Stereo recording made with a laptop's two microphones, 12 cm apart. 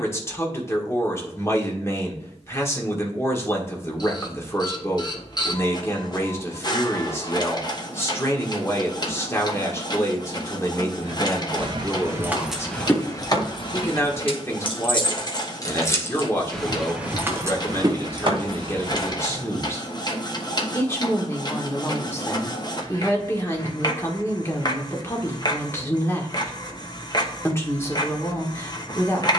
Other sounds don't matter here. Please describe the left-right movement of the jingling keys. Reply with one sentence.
In this clip you hear the jingling keys go left and come back.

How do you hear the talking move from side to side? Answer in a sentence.
You can hear the talking stay in one place.